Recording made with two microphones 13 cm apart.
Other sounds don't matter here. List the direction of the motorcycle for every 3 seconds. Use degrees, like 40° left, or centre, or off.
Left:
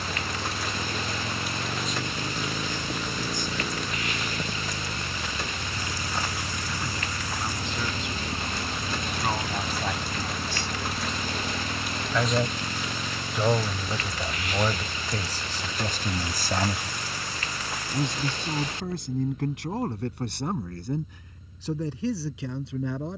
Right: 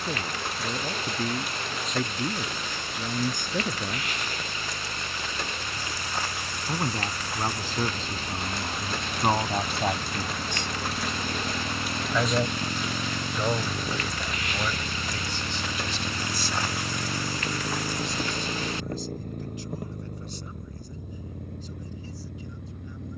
50° left, 40° left, 20° left, centre, 20° right, 40° right, 60° right, 60° right.